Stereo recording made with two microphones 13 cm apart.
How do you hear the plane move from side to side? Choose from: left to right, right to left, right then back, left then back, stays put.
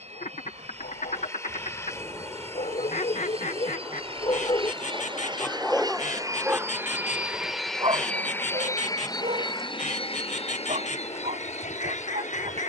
right to left.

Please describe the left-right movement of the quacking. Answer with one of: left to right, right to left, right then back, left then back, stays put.
stays put.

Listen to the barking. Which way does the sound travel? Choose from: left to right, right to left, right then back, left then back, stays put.
left to right.